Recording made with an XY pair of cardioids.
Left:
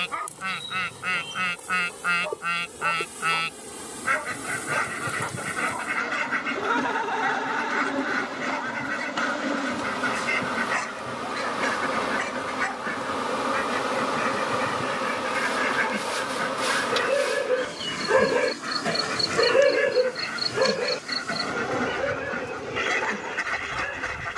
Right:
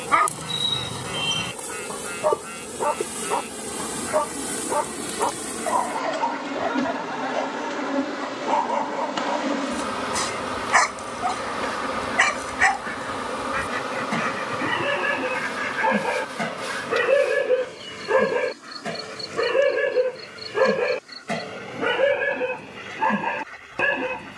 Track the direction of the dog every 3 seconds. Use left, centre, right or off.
right, right, right, right, right, right, centre, right.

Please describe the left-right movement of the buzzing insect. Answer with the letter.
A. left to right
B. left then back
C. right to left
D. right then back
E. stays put
C.